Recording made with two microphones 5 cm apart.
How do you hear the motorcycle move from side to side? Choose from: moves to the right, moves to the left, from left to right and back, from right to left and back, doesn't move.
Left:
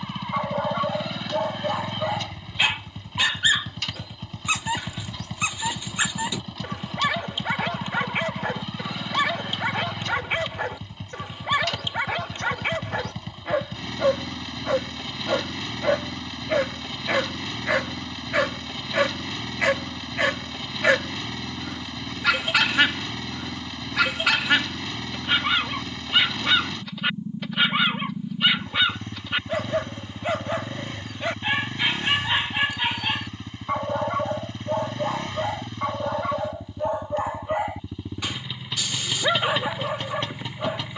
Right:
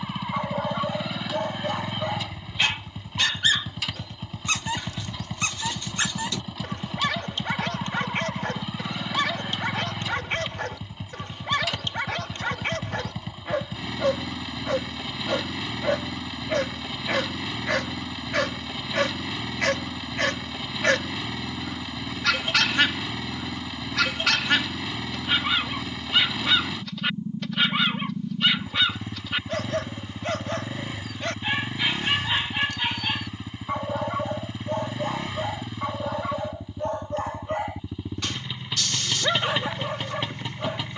doesn't move.